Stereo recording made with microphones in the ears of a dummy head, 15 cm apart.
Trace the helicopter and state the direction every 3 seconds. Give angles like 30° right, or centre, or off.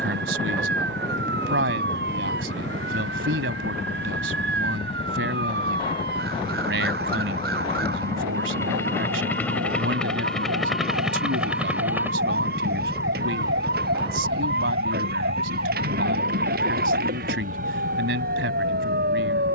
40° left, 40° left, 20° left, centre, 20° right, 50° right, 60° right.